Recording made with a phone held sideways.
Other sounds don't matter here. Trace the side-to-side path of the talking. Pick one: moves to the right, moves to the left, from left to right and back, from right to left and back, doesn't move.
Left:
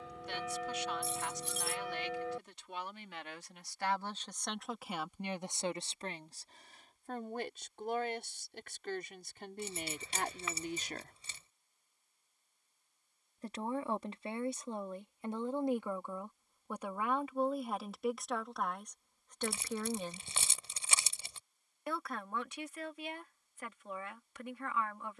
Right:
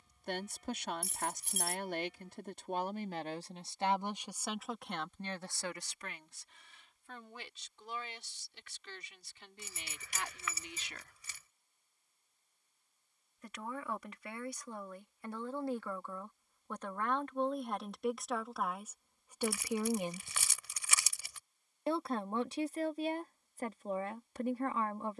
from right to left and back.